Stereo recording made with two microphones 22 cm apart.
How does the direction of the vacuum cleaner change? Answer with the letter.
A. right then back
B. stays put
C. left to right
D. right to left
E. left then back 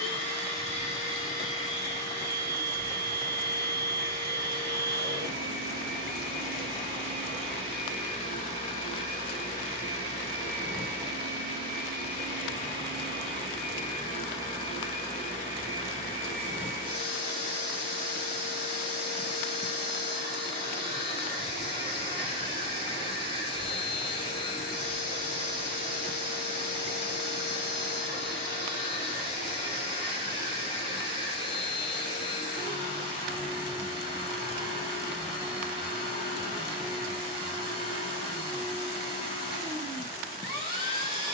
B.